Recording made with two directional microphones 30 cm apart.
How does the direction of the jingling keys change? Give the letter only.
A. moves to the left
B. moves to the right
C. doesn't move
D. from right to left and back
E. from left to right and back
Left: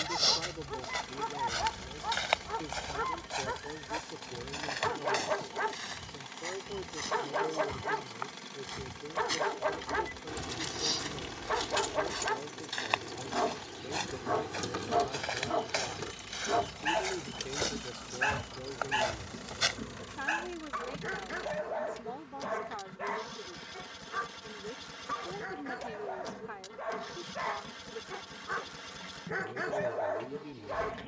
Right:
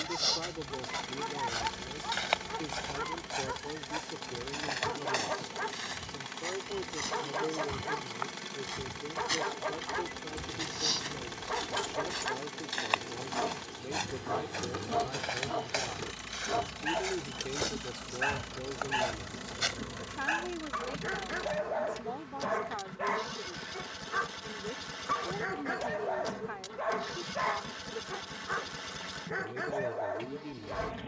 B.